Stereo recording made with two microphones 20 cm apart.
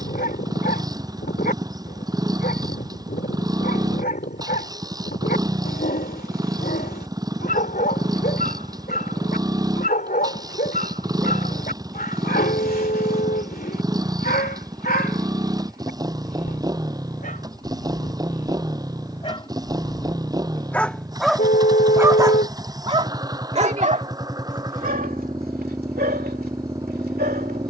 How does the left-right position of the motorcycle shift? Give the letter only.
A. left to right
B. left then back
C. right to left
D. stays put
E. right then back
D.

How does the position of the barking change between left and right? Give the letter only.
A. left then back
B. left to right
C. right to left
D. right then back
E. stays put
B.